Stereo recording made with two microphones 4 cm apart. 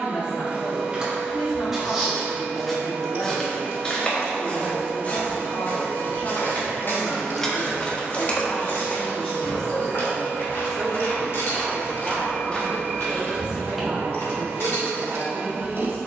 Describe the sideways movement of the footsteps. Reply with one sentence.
You can hear the footsteps move from right to left and back again.